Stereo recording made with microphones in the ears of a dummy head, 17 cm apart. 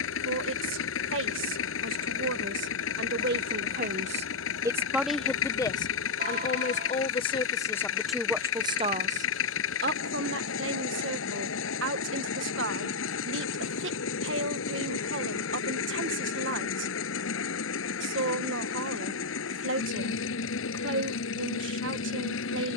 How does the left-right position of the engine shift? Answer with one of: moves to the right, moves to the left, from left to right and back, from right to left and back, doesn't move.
doesn't move.